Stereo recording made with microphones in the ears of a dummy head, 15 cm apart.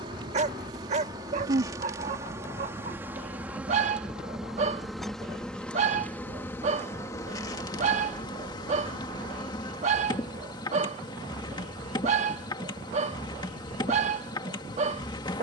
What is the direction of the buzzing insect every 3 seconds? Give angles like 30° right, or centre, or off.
20° right, centre, 20° left, 20° left, 20° left.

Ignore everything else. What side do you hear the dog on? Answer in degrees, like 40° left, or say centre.
40° right.